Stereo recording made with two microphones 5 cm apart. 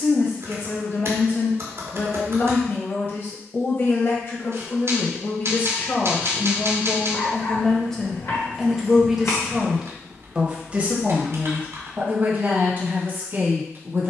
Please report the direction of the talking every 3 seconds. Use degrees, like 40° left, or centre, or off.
50° left, 40° left, 20° left, 20° right, 40° right.